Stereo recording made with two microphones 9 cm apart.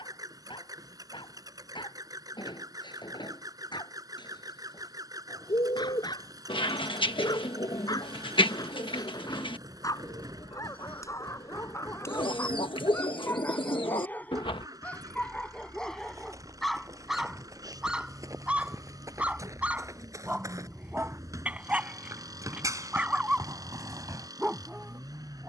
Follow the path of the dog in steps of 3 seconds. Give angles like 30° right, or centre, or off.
60° left, 60° left, 50° left, 40° left, 20° left, centre, 10° right, 20° right, 20° right.